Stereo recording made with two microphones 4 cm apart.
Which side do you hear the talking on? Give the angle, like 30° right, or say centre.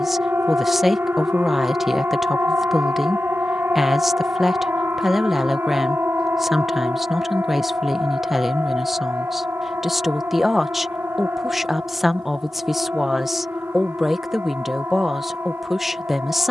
centre.